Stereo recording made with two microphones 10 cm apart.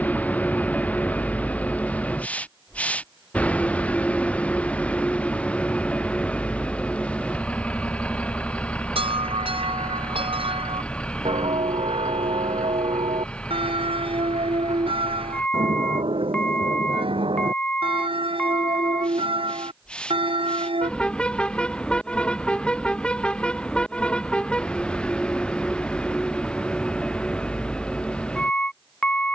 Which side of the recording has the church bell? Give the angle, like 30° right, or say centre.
70° right.